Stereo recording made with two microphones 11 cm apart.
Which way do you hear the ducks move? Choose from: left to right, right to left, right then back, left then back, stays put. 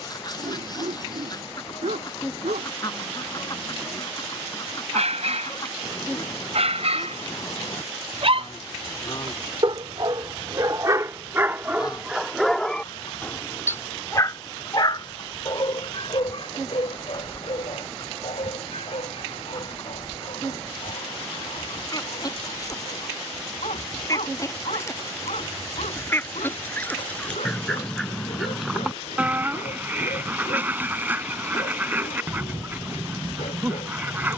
left to right.